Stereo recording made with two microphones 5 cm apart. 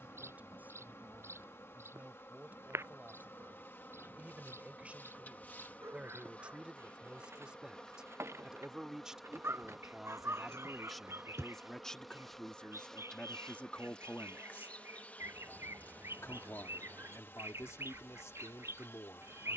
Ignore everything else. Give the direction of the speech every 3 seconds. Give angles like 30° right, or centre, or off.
30° right, 30° right, 20° right, centre, 30° left, 70° left, 80° left.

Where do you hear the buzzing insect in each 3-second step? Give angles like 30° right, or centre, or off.
50° left, 40° left, 20° left, centre, 20° left, 40° left, 50° left.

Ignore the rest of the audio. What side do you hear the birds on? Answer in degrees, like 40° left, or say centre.
60° right.